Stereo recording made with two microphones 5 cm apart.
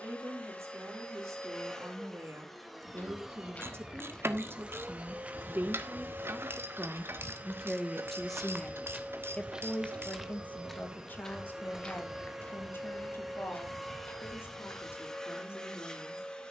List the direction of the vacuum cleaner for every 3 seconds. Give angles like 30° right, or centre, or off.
10° left, 20° right, 40° right, 20° right, centre, 10° left.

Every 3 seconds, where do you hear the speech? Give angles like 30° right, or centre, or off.
70° right, 50° right, 10° right, 30° left, 50° left, 60° left.